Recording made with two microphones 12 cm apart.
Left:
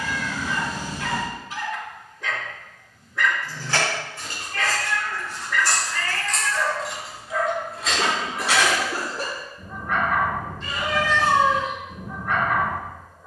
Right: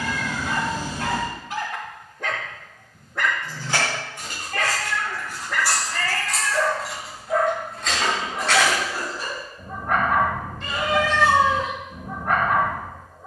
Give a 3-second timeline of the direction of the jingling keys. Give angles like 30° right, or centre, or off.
off, 20° right, centre, 30° left, 40° left.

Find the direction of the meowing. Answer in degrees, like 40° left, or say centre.
70° right.